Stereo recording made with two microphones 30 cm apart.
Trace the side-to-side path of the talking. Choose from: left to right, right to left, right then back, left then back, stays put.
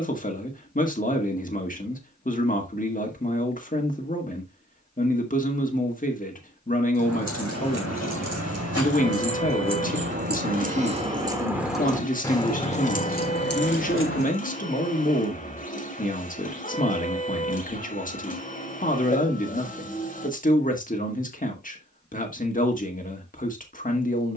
stays put.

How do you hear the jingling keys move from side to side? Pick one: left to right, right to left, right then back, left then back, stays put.
right to left.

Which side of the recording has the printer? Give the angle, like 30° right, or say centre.
30° left.